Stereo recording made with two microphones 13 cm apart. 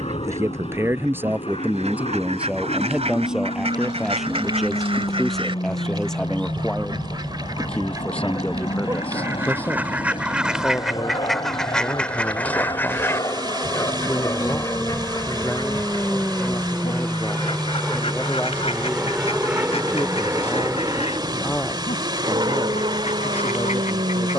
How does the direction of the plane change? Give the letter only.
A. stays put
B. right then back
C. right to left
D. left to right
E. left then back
D.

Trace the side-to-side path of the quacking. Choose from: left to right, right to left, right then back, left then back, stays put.
right to left.